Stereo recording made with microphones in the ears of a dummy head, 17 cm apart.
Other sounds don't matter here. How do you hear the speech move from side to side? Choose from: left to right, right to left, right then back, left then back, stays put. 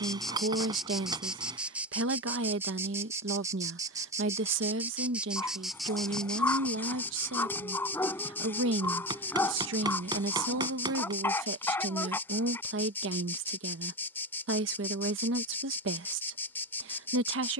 stays put.